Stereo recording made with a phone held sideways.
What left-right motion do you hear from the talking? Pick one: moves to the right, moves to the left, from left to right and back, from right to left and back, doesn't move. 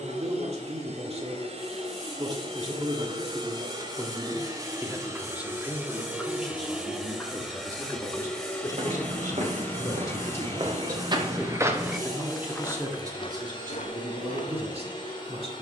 from right to left and back.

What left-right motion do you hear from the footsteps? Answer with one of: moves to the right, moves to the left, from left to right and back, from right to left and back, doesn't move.
moves to the left.